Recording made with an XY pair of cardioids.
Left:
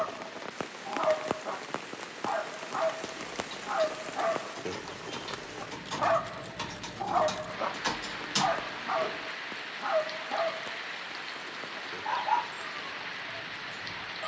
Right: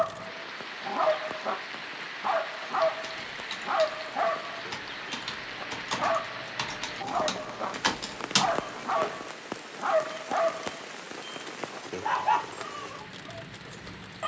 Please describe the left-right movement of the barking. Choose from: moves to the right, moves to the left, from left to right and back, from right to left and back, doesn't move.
from right to left and back.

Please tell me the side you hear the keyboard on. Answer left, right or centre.
right.